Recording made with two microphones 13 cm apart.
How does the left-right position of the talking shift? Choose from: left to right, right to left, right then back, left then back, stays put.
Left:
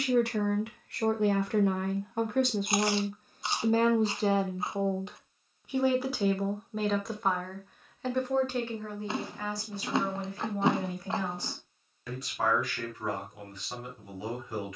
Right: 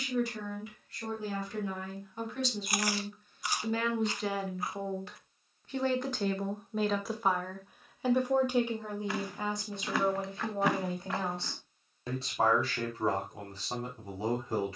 left to right.